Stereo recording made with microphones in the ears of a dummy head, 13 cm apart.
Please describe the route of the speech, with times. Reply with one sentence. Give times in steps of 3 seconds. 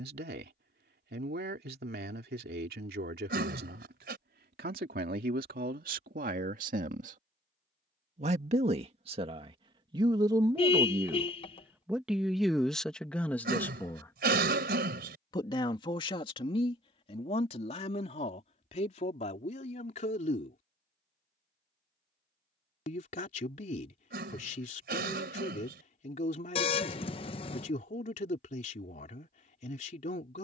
You can hear the speech on the right from 0 s, in the centre from 12 s and on the left from 15 s.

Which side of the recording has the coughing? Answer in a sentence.
In this clip you hear the coughing on the right.